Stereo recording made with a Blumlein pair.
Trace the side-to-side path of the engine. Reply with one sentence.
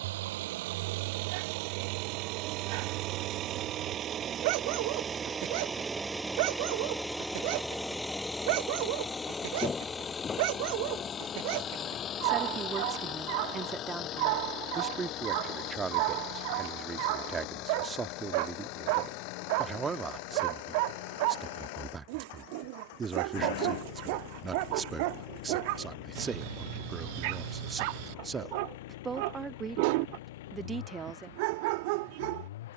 You can hear the engine travel towards the left.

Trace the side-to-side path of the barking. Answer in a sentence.
In this clip you hear the barking stay put.